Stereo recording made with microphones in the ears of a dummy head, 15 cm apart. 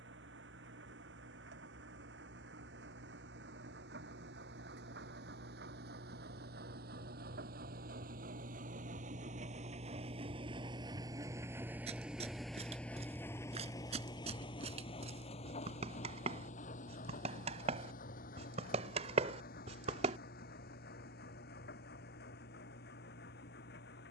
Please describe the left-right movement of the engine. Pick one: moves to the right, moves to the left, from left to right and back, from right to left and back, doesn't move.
moves to the left.